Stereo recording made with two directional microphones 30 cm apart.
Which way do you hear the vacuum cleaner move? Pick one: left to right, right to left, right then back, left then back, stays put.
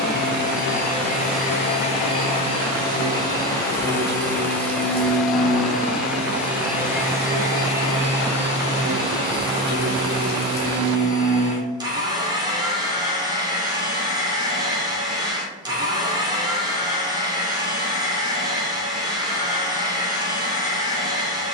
left to right.